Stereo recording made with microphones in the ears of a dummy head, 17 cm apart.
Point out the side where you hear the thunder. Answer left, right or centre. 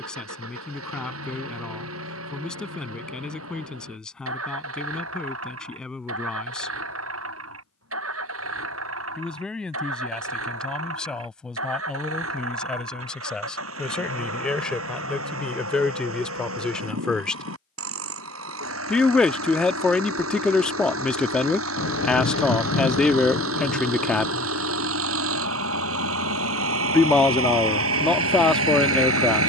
left.